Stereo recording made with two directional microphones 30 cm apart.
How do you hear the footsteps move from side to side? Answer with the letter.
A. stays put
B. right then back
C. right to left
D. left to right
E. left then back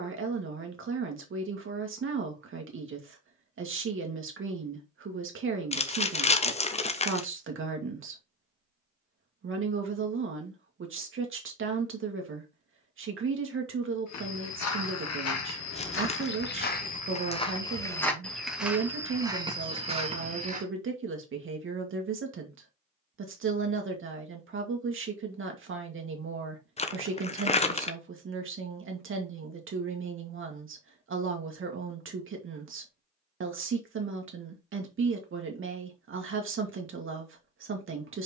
D.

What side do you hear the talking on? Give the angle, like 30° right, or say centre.
40° right.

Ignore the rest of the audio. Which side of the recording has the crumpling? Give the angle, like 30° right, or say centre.
20° left.